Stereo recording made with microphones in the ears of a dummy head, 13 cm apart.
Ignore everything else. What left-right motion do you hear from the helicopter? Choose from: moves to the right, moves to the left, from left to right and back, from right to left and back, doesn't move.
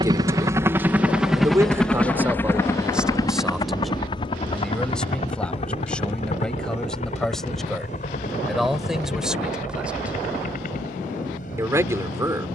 moves to the left.